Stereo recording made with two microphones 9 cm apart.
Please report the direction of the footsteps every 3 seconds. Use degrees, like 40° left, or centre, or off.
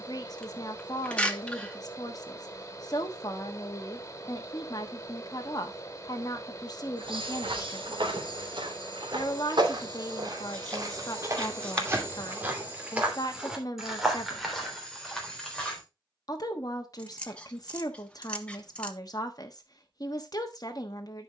off, off, 70° right, 50° right, 10° right, 10° left, off.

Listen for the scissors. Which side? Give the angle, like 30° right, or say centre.
10° left.